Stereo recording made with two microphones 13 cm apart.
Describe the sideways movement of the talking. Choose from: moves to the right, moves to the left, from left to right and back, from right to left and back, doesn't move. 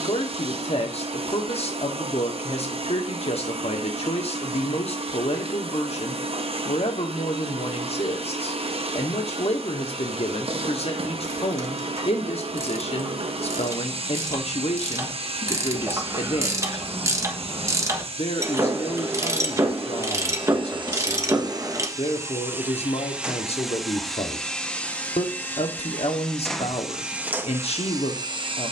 doesn't move.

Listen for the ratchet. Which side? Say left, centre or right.
right.